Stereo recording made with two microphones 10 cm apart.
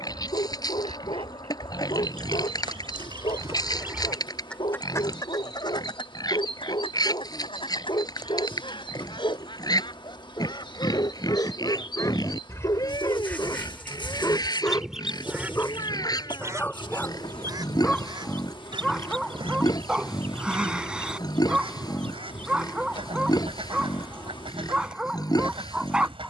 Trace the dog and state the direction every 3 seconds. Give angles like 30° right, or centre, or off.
60° left, 60° left, 50° left, 40° left, 40° left, 20° left, 10° right, 10° right, 10° right.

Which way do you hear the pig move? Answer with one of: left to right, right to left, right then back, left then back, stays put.
stays put.